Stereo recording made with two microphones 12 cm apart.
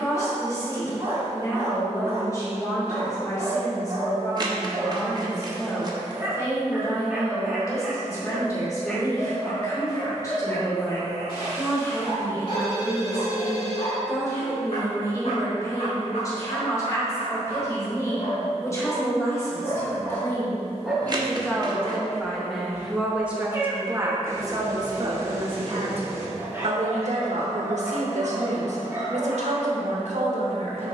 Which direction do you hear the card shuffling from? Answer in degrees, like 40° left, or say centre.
40° right.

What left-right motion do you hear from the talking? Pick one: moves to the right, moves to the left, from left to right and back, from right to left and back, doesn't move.
moves to the right.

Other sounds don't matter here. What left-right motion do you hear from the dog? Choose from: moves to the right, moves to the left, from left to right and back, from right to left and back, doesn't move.
from right to left and back.